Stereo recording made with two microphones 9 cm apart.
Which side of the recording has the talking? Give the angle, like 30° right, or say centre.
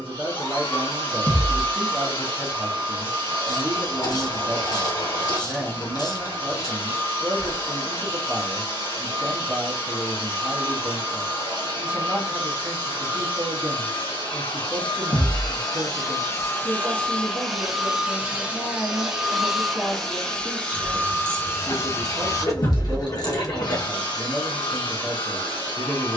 20° right.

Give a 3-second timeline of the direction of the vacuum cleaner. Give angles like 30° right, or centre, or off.
70° left, 70° left, 70° left, 70° left, 70° left, 30° left, centre, 40° left, 60° left.